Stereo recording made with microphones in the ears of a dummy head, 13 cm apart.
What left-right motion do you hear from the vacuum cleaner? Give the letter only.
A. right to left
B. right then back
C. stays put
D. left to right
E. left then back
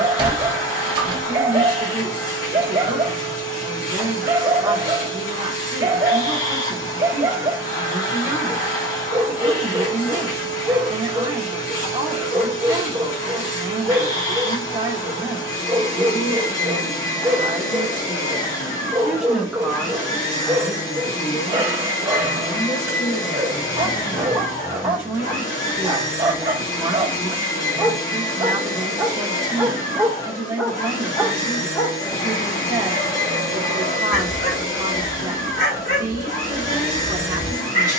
C.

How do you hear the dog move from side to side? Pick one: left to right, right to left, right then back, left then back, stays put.
right to left.